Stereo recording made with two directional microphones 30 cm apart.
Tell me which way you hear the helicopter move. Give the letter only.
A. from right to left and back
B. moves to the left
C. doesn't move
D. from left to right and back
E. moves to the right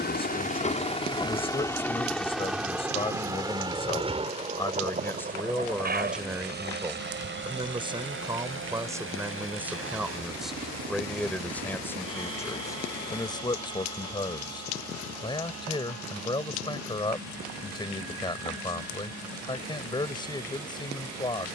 E.